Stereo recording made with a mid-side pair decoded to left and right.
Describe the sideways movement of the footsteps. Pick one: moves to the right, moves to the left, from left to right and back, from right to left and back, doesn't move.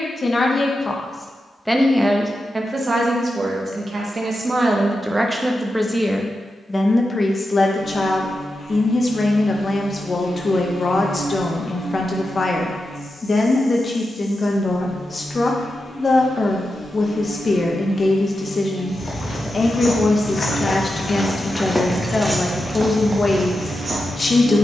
moves to the right.